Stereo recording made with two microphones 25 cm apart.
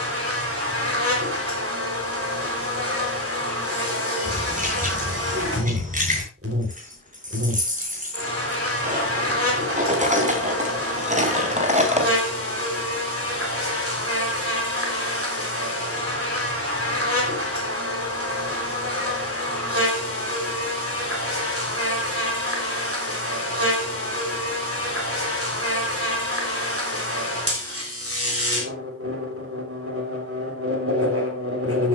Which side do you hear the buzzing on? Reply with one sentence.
In this clip you hear the buzzing on the right.